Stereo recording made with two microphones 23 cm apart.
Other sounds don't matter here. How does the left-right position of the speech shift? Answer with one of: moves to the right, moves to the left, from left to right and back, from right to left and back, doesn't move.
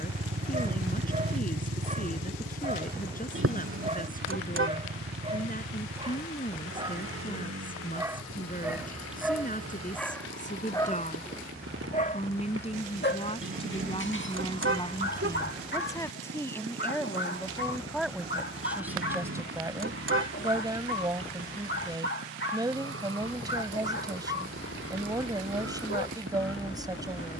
moves to the right.